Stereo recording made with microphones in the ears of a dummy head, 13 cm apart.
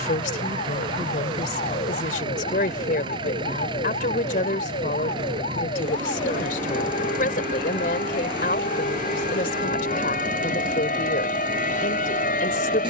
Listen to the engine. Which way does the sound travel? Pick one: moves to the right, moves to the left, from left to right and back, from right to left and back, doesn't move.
doesn't move.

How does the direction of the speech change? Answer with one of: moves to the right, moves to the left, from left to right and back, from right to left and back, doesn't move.
doesn't move.